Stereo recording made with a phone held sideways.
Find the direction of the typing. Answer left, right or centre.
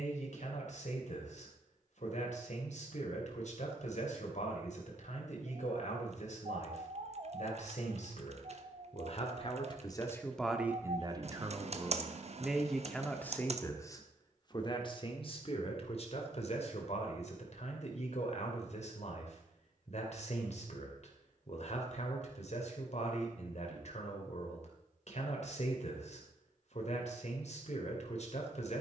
right.